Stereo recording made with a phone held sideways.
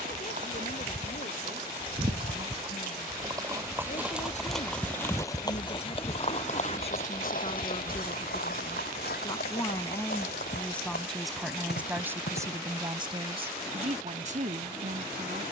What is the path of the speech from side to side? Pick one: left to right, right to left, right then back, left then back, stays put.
left to right.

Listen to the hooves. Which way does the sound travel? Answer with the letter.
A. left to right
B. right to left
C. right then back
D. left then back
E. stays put
B.